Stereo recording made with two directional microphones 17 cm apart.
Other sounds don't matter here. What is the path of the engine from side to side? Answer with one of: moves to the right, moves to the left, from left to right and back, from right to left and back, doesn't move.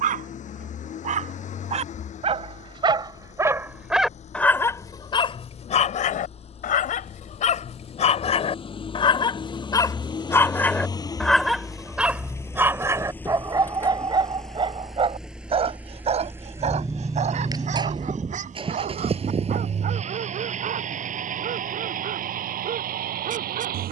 moves to the right.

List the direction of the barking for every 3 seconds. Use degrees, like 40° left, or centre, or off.
40° right, 10° left, 50° left, 10° left, 20° right, 40° right, 50° right, 50° right.